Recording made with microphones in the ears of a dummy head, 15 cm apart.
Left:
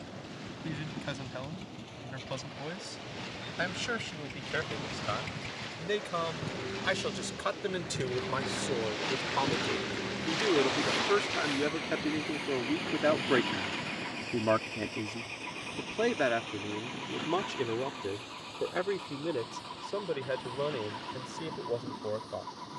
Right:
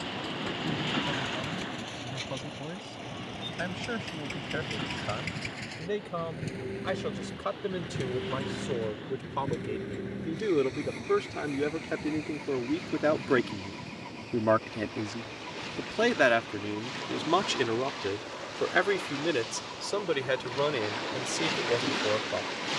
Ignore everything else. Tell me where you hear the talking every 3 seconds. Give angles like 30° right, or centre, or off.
70° left, 60° left, 60° left, 40° left, 10° left, 30° right, 60° right, 70° right.